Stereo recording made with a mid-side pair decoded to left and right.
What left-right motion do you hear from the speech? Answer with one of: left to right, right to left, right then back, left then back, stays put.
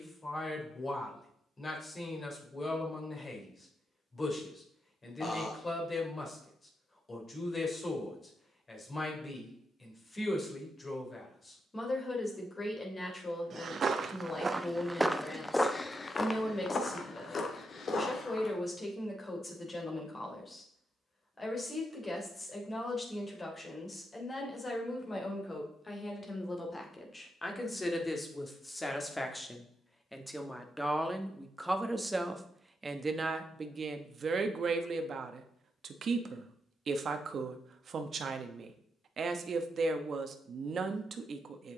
left to right.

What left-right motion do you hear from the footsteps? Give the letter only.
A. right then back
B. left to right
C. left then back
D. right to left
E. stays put
D.